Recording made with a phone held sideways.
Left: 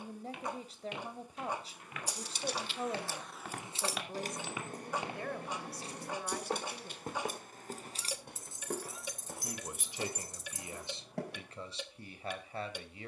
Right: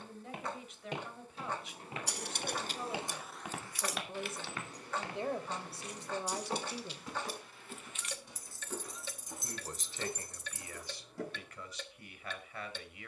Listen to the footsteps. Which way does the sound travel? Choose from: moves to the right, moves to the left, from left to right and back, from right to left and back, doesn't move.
moves to the left.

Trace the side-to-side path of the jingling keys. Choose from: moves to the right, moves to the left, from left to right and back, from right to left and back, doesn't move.
from right to left and back.